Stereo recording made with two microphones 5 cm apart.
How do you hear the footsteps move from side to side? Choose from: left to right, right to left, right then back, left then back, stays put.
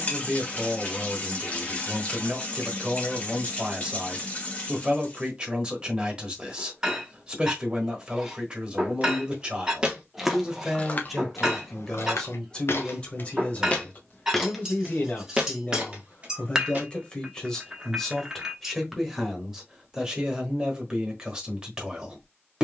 left then back.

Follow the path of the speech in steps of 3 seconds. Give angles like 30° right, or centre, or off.
20° right, 20° right, 20° right, 10° right, 30° left, 20° left, 10° right, 20° right.